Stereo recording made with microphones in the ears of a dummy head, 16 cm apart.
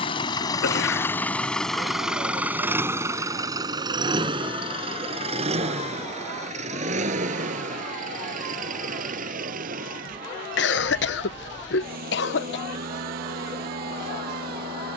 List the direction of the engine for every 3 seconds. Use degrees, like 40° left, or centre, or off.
10° left, 30° right, 40° right, 50° right, 50° right.